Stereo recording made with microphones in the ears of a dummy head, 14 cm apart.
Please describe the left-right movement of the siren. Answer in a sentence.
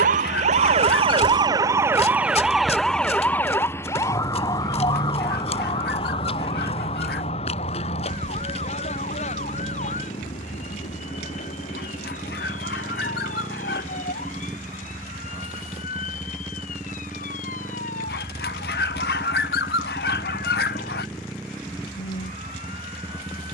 In this clip you hear the siren travel towards the left.